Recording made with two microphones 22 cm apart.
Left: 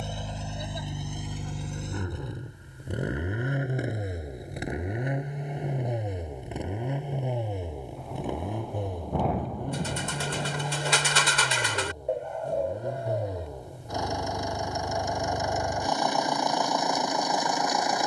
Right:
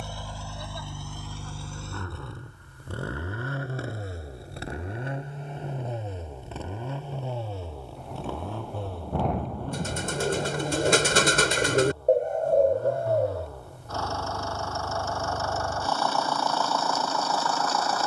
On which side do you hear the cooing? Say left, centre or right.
right.